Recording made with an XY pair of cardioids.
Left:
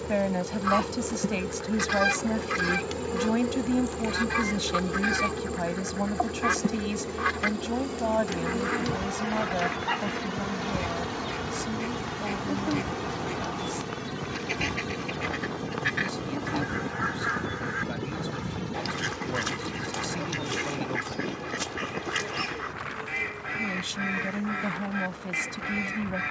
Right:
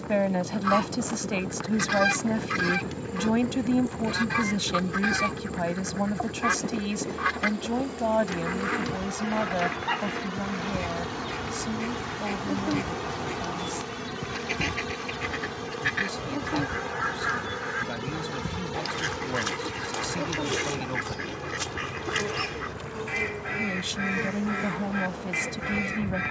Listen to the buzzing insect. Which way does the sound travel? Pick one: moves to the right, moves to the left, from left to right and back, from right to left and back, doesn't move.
moves to the right.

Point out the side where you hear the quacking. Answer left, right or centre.
centre.